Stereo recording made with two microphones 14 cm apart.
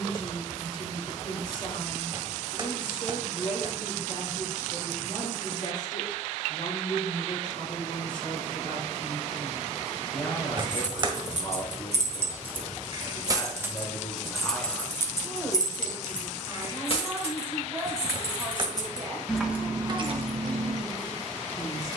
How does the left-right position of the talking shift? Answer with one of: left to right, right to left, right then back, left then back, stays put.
left to right.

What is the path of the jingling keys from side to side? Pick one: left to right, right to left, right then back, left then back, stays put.
left then back.